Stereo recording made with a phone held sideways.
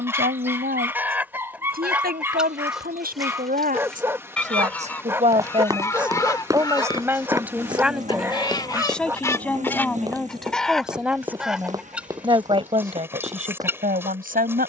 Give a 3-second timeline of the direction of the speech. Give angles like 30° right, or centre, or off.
70° right, 50° right, 10° right, centre, 50° right.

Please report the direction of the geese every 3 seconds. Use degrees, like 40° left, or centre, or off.
10° right, 10° left, 30° left, 10° left, 10° right.